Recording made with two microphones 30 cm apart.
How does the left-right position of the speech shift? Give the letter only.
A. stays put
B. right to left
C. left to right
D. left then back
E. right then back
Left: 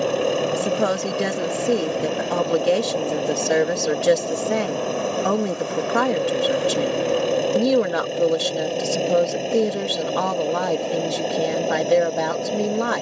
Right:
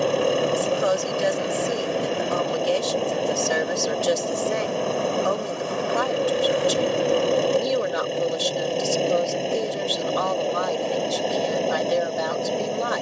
A.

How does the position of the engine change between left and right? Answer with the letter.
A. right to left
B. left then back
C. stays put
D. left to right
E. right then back
C.